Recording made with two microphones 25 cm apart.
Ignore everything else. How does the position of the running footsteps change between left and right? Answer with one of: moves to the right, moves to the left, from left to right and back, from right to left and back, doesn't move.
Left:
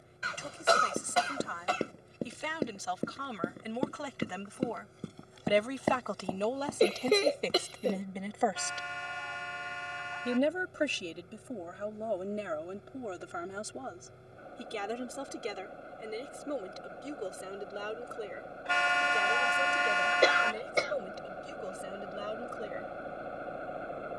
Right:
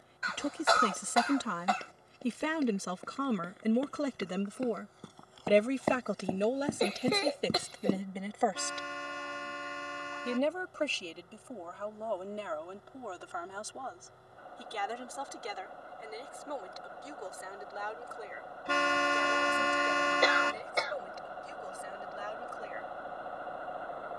moves to the right.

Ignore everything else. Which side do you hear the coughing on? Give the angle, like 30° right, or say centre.
30° left.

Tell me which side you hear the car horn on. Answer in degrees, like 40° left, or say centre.
50° right.